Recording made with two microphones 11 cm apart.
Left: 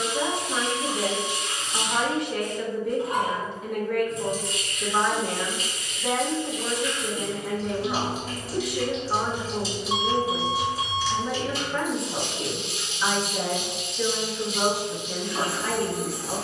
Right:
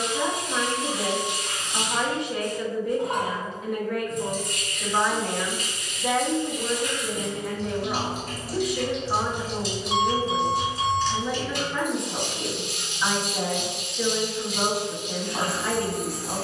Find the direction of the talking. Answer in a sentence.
You can hear the talking in the centre.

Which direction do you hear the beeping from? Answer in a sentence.
You can hear the beeping in the centre.